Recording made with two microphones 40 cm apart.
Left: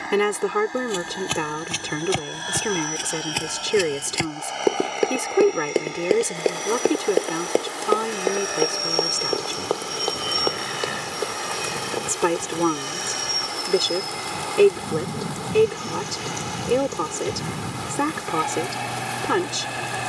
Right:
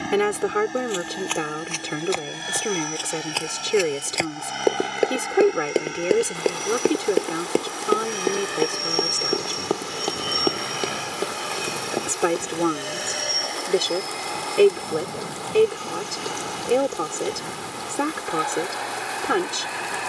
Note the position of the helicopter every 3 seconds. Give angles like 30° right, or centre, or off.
40° right, 30° right, 20° right, centre, 20° left, 30° left, 40° left.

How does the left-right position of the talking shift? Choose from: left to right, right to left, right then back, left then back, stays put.
stays put.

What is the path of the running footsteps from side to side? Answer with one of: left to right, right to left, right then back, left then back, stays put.
left to right.